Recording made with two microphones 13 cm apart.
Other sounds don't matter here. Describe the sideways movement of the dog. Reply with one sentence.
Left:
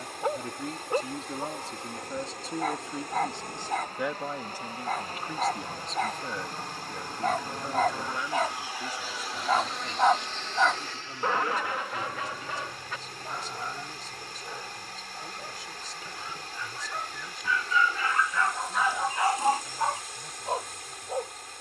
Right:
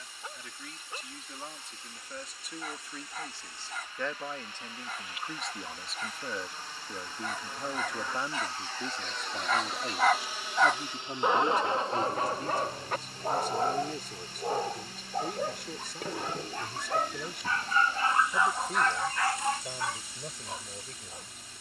You can hear the dog move from left to right and back again.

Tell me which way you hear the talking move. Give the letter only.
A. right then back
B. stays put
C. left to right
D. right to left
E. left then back
C.